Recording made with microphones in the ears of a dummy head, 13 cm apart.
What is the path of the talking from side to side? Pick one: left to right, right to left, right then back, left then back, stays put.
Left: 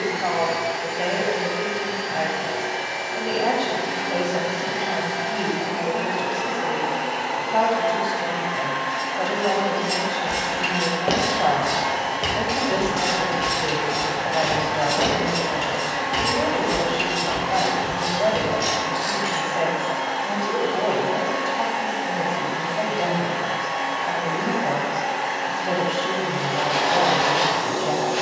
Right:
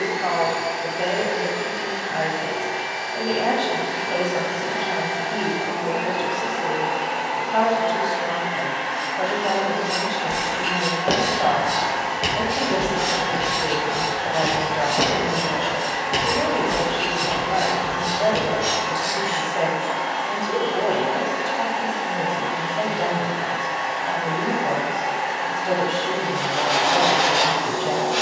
stays put.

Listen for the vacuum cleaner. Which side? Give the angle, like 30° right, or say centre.
80° left.